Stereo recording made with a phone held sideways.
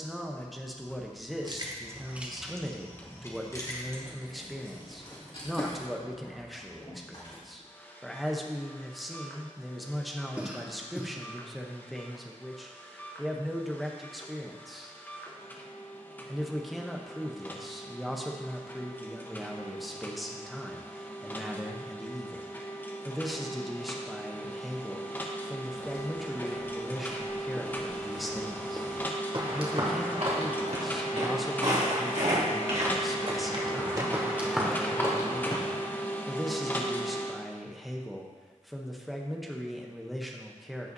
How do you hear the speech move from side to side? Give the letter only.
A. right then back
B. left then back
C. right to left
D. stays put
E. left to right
D.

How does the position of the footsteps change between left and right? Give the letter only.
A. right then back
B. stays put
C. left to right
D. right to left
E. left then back
A.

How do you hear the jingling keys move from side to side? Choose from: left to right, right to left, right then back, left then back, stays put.
right to left.